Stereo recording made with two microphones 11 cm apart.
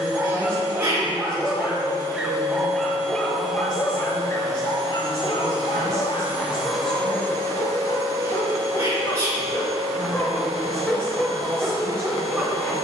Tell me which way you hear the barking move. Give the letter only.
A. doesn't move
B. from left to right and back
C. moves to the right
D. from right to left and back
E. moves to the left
D.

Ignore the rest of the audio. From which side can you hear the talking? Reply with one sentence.
You can hear the talking in the centre.